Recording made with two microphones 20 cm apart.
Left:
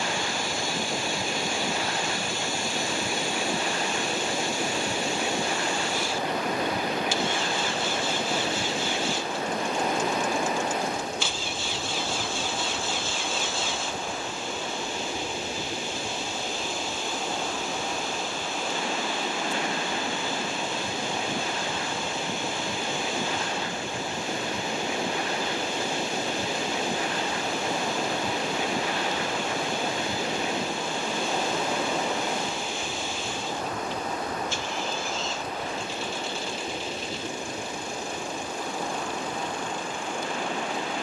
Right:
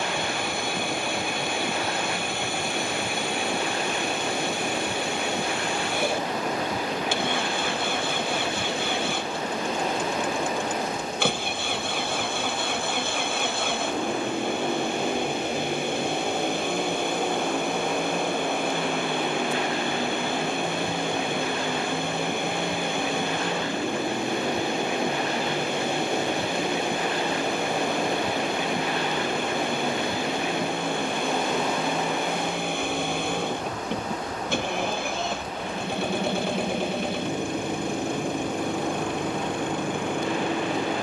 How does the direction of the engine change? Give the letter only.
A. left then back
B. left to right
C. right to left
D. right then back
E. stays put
E.